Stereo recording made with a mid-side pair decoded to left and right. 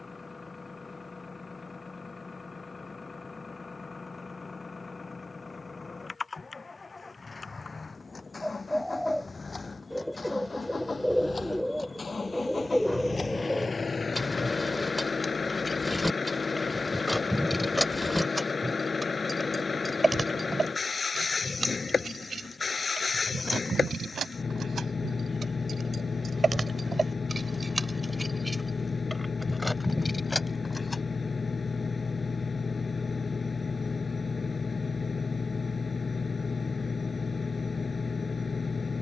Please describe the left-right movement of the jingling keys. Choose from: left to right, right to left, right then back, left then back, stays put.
right then back.